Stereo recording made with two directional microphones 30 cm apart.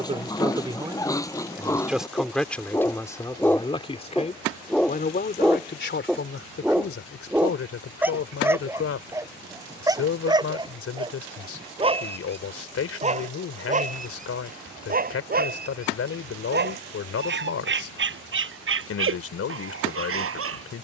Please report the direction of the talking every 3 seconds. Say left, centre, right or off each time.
centre, left, left, left, left, left, left.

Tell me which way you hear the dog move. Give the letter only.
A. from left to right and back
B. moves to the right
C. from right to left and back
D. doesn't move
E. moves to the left
B.